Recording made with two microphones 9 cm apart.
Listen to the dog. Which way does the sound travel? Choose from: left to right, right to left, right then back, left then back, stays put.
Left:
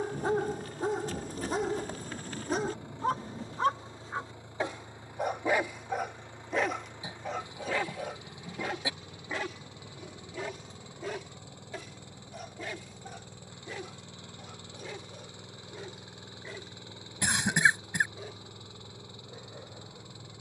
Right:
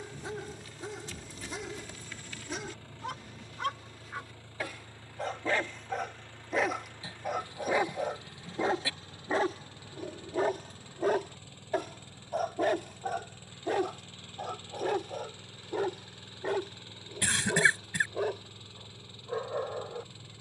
left to right.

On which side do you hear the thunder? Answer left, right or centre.
left.